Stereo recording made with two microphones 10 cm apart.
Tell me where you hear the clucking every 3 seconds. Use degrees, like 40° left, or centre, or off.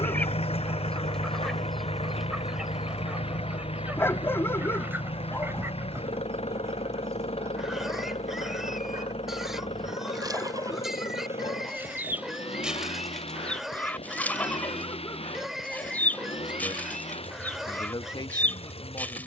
centre, 20° right, 30° right, 40° right, 10° left, 20° left, 20° left.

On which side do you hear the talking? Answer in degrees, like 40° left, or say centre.
50° left.